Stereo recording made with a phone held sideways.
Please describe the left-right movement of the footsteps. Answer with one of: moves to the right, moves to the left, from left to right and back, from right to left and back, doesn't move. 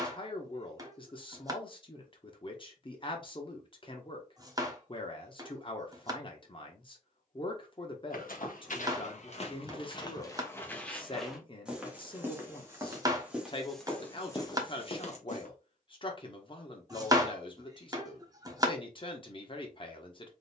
from left to right and back.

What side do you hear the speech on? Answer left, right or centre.
left.